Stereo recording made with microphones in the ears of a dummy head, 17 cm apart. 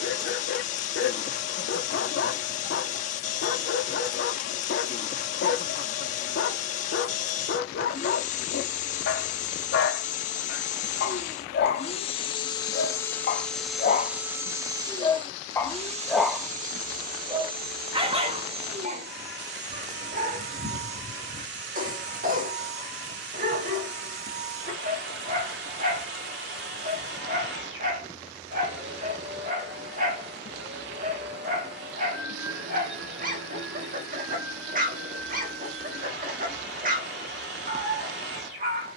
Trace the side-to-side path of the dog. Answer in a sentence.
In this clip you hear the dog go from the left side to the right.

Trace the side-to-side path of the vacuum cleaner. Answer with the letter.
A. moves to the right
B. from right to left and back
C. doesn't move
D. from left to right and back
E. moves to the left
A.